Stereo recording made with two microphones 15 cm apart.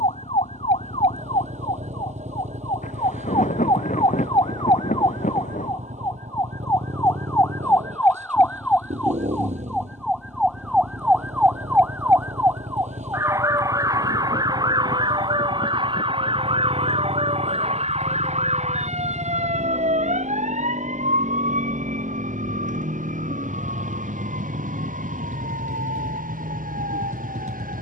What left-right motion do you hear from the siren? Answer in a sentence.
In this clip you hear the siren move to the right.